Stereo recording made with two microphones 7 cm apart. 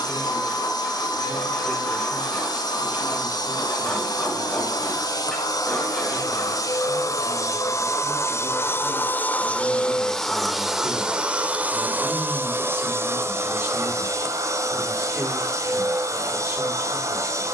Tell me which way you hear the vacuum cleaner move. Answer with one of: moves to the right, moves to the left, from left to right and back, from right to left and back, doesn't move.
moves to the right.